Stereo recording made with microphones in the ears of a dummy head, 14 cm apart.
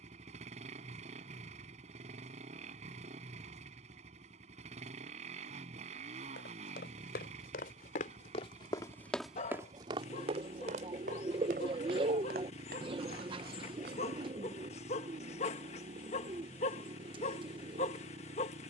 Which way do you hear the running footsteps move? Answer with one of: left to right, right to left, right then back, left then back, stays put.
left to right.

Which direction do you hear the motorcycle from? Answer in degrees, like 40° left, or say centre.
50° right.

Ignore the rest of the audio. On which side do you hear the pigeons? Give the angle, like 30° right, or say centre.
30° right.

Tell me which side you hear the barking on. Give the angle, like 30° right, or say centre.
50° left.